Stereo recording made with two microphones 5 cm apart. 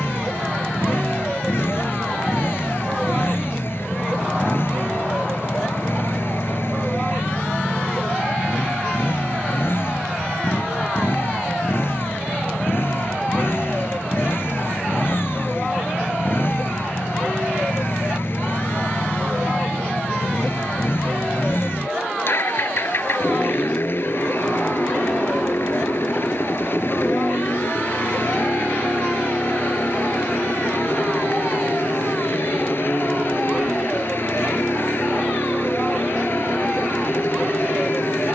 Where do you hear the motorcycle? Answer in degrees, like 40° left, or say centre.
50° left.